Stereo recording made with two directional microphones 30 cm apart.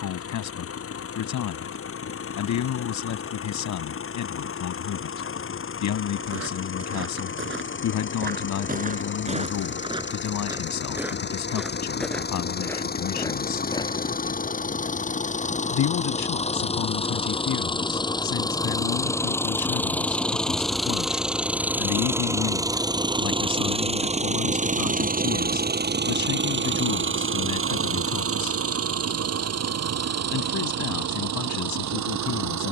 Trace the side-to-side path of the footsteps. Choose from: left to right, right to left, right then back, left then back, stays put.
right to left.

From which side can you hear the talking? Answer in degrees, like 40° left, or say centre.
70° left.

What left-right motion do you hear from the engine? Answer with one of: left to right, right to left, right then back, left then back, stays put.
left to right.